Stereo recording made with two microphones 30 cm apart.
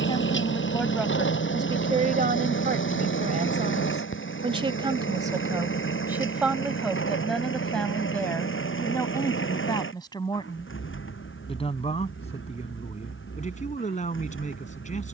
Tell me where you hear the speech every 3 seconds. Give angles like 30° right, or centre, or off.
20° right, 20° right, centre, 20° left, 20° left.